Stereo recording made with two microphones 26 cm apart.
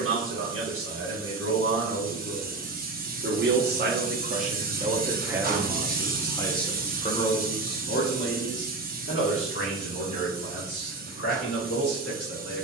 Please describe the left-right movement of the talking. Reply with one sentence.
You can hear the talking move from right to left.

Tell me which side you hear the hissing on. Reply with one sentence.
You can hear the hissing on the right.